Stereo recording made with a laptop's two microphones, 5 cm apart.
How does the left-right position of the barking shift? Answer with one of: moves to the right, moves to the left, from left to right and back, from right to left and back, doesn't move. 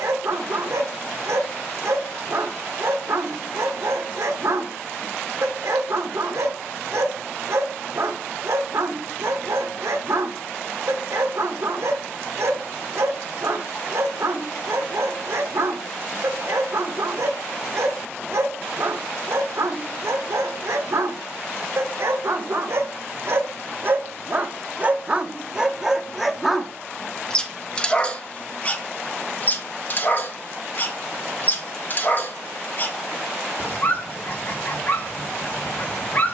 moves to the left.